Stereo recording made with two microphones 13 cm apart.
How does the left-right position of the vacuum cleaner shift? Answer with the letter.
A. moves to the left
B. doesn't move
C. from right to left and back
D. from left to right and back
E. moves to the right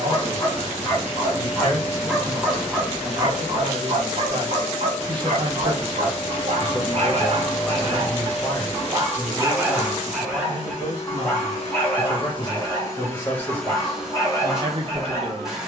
C.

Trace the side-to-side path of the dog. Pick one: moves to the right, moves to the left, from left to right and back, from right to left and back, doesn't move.
from left to right and back.